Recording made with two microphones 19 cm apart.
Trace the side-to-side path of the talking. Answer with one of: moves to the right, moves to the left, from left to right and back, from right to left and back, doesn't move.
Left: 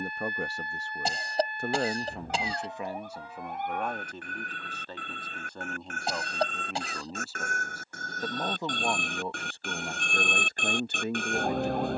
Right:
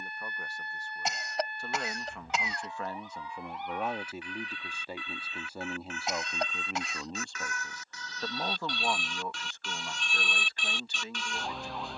from left to right and back.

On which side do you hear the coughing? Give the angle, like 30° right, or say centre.
30° left.